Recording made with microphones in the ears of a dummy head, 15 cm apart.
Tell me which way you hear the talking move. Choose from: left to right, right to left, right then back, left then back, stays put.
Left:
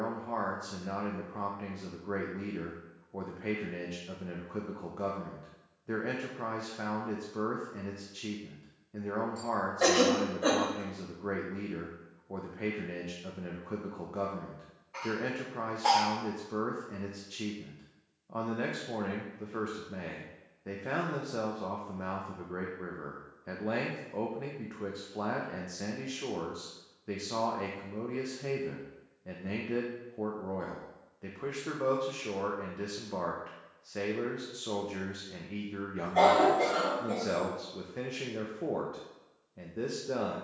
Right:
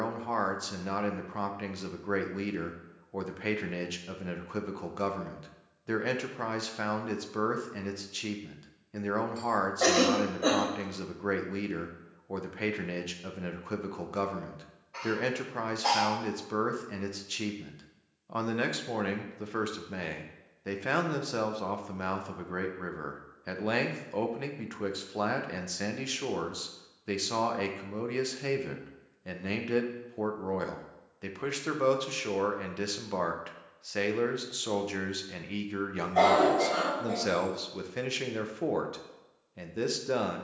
stays put.